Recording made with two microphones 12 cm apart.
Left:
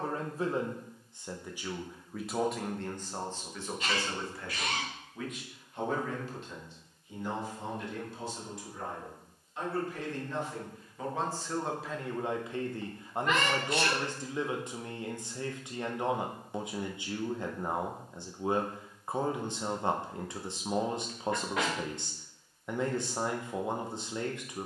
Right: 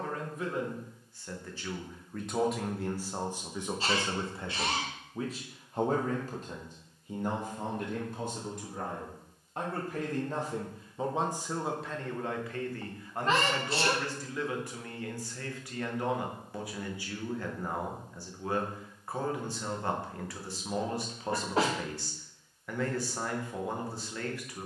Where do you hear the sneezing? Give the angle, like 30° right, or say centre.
30° right.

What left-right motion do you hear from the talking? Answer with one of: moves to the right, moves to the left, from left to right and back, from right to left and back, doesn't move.
from left to right and back.